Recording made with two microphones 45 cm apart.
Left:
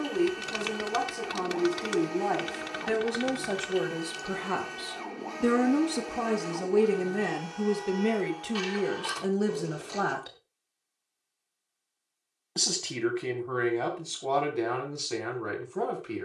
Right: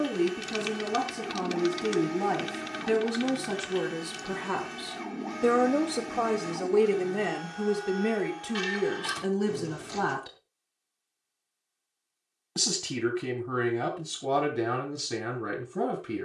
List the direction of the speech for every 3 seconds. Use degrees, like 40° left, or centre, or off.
30° right, centre, centre, 10° right, 30° right, 30° right.